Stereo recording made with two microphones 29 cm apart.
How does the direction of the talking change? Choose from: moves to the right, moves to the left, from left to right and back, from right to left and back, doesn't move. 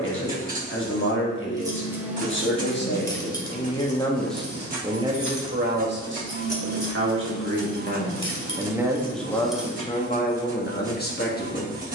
from left to right and back.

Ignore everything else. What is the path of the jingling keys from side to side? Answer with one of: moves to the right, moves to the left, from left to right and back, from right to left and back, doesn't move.
from right to left and back.